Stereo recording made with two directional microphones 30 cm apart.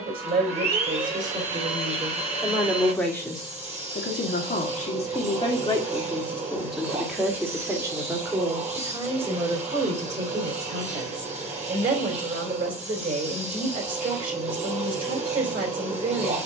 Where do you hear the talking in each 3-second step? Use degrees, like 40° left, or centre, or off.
20° right, 20° left, 10° right, 20° right, 30° right, 30° right.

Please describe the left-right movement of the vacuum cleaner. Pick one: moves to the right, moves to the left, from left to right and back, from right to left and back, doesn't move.
doesn't move.